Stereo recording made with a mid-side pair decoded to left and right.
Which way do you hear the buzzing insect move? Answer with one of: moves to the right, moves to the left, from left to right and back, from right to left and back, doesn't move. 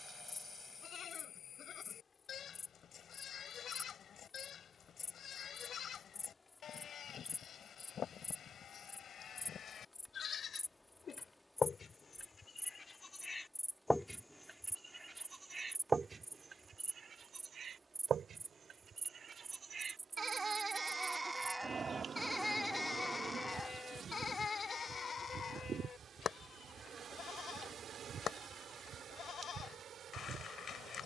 moves to the right.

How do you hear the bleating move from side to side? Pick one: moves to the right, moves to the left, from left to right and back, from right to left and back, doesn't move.
from left to right and back.